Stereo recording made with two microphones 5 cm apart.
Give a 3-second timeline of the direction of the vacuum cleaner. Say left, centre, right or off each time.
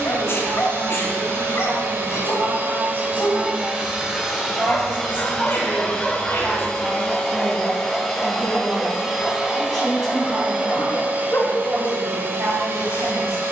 right, centre, centre, right, right.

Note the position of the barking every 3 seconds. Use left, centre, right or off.
left, left, centre, left, left.